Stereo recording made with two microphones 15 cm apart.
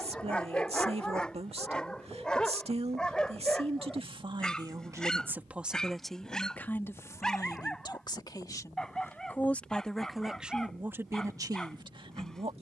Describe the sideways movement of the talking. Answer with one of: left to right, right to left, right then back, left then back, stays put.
left then back.